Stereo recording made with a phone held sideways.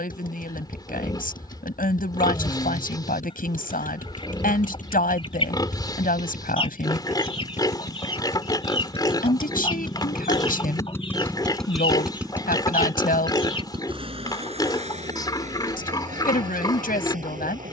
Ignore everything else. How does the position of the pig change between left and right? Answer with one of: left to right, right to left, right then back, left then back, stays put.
stays put.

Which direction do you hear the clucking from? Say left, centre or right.
left.